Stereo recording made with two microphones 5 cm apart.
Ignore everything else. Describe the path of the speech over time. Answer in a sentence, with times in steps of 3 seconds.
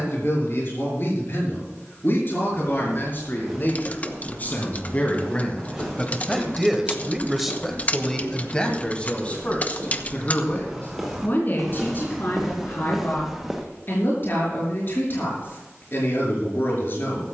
You can hear the speech on the left from 0 s, in the centre from 6 s and on the left from 9 s.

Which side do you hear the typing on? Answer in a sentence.
You can hear the typing on the left.